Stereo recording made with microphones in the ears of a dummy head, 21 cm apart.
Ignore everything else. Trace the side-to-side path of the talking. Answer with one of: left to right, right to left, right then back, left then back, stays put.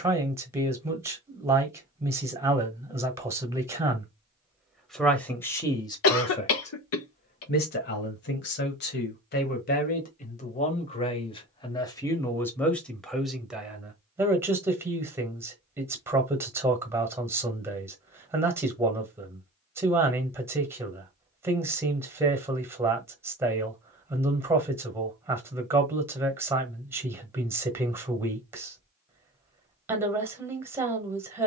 left then back.